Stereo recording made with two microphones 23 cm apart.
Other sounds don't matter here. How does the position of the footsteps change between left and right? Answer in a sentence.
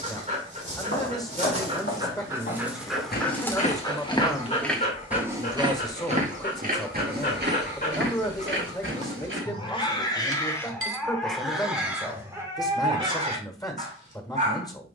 You can hear the footsteps move to the right.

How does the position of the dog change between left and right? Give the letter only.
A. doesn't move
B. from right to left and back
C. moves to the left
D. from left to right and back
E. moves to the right
B.